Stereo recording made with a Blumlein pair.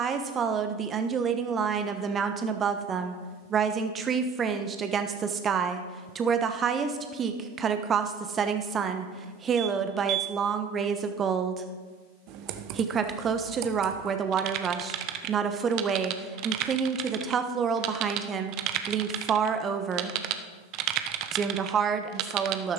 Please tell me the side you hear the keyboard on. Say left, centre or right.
right.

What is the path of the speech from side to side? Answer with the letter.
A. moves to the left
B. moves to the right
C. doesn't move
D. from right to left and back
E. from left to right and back
C.